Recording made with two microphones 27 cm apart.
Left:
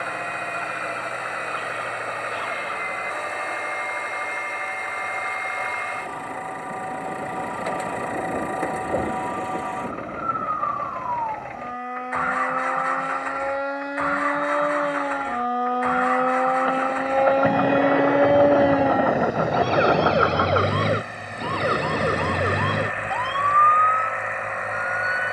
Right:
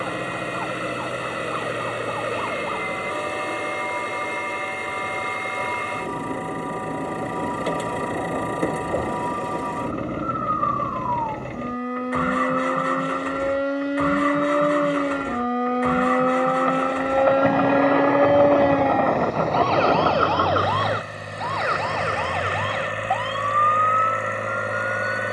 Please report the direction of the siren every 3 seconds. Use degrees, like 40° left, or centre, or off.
60° right, 60° right, 60° right, 50° right, 40° right, 20° right, 10° left, 40° left, 60° left.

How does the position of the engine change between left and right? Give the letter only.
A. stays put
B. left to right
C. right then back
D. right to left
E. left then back
A.